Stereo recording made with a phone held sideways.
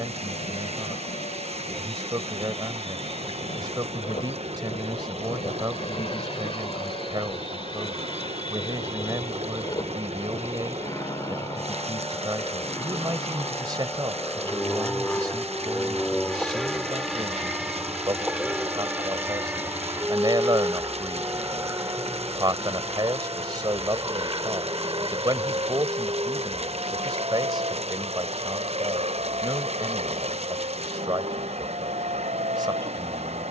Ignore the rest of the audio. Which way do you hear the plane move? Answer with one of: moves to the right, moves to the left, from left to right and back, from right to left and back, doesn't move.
moves to the right.